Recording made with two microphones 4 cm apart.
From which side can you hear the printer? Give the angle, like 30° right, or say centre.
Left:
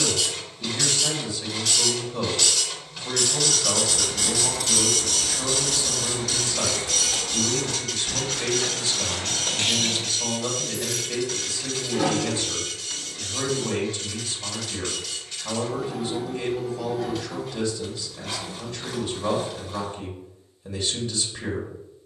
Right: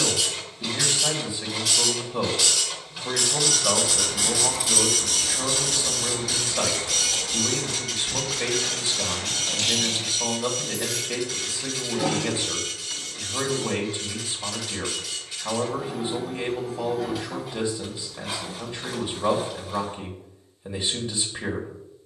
10° right.